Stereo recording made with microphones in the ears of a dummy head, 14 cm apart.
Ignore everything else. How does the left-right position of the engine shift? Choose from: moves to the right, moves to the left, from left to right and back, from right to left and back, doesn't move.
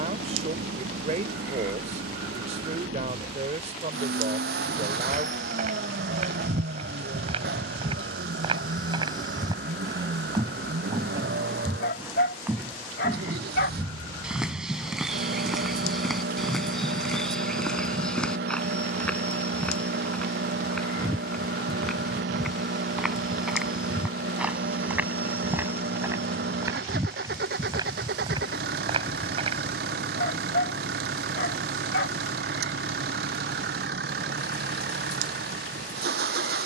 doesn't move.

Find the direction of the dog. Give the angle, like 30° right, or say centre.
70° left.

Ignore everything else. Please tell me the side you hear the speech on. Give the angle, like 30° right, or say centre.
40° right.